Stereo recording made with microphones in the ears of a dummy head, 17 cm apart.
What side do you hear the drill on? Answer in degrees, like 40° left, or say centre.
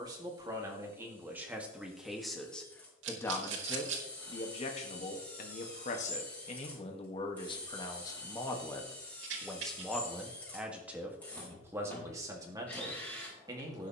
10° left.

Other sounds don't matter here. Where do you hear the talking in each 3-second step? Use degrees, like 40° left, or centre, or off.
10° right, 30° left, 20° left, 10° right, 20° right.